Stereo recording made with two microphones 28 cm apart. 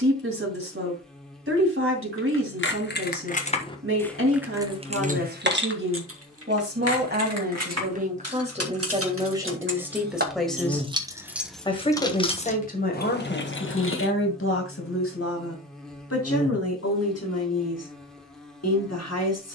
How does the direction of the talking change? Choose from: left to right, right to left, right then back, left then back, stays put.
right to left.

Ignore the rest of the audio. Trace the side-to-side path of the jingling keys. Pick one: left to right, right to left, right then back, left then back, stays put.
right then back.